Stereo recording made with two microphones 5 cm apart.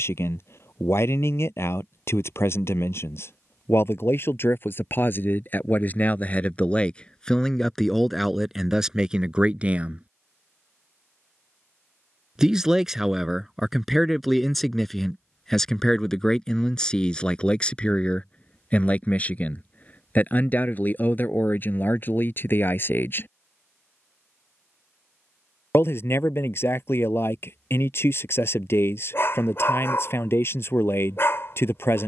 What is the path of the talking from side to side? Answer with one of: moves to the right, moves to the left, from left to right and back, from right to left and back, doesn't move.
from left to right and back.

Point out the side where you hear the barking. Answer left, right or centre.
left.